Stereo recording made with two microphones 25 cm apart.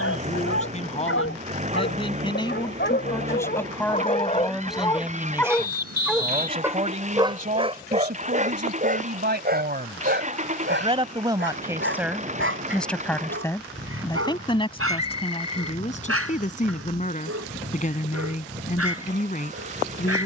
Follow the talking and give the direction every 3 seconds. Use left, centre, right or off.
left, centre, right, right, centre, left, left.